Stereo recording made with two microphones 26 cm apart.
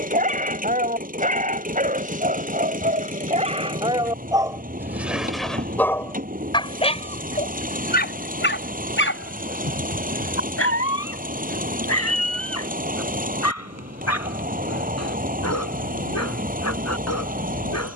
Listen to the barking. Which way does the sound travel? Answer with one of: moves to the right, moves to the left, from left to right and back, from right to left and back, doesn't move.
moves to the left.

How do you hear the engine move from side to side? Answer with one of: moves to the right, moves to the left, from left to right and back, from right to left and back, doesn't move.
doesn't move.